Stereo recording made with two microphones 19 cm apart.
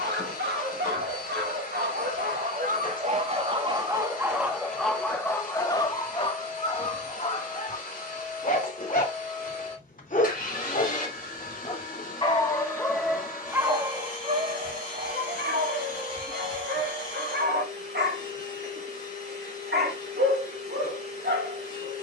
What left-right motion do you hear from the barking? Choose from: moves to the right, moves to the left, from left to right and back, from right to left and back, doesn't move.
from right to left and back.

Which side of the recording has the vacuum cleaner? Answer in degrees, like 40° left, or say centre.
50° left.